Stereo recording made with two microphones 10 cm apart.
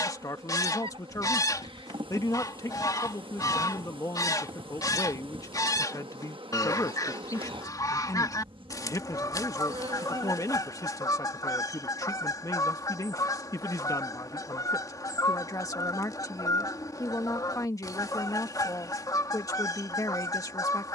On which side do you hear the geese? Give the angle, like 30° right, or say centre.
40° left.